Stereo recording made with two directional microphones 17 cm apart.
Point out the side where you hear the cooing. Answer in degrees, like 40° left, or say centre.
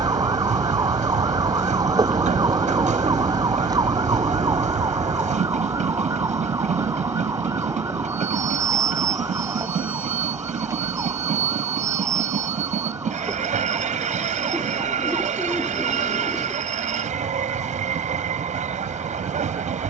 centre.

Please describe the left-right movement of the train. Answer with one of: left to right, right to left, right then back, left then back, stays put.
stays put.